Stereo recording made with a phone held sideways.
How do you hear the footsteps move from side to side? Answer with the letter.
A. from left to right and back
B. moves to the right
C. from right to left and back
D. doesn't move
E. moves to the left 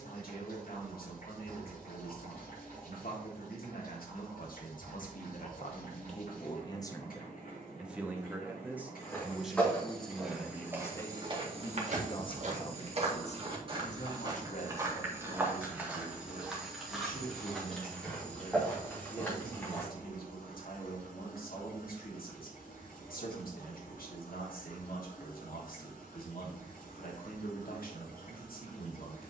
A.